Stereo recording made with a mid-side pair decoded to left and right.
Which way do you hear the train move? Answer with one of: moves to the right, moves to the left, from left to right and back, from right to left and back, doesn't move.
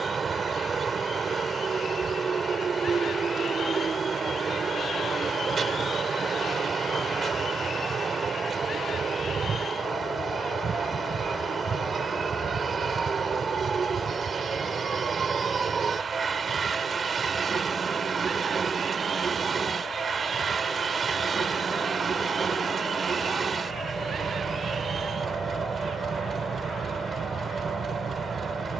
doesn't move.